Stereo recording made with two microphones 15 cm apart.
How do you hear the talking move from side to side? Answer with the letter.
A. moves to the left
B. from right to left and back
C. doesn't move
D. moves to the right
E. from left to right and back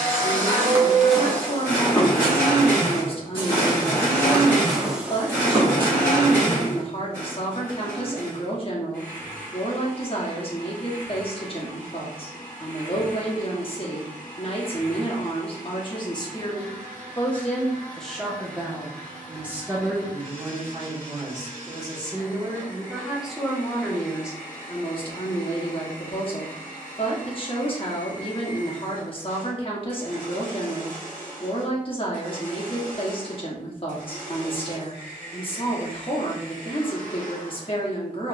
E.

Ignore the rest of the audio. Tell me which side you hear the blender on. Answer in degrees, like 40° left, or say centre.
20° left.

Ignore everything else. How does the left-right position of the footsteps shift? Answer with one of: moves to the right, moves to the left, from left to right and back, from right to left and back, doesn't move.
from right to left and back.